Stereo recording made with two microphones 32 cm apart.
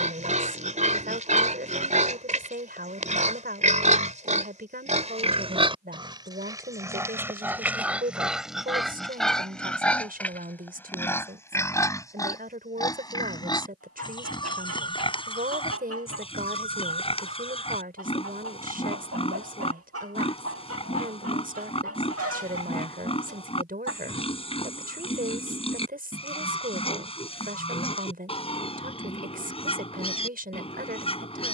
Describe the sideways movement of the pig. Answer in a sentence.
You can hear the pig travel towards the left.